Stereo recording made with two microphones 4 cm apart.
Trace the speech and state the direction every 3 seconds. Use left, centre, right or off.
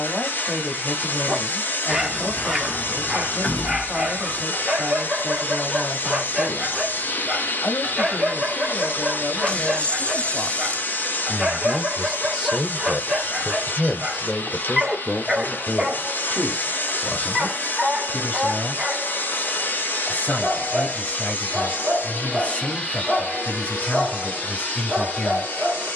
left, left, left, left, centre, left, left, left, left.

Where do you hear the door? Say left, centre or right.
left.